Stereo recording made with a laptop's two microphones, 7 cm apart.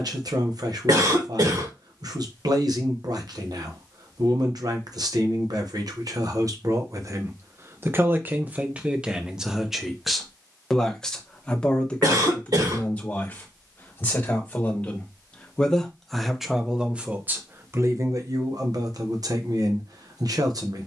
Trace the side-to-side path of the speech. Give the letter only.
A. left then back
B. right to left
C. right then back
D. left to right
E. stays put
A.